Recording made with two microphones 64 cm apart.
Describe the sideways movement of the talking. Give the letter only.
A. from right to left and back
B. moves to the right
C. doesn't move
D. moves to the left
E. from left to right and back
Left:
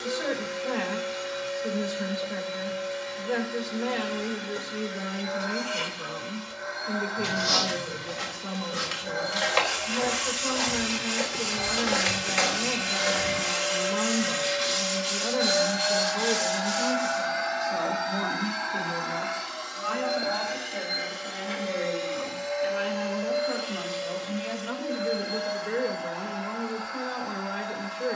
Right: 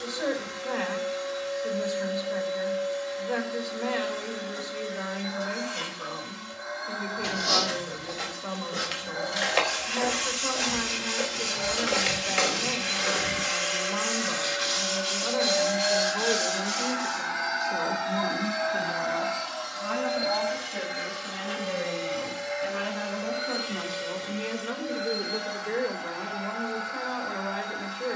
E.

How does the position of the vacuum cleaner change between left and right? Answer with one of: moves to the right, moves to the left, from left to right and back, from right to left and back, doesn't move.
moves to the right.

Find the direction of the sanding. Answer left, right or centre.
right.